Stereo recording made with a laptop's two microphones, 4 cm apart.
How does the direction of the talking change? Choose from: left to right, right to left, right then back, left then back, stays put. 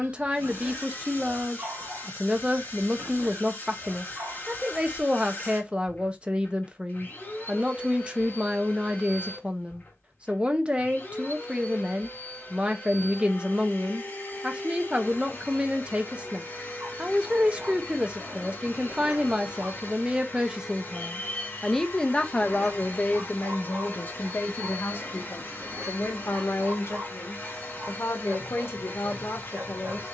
right to left.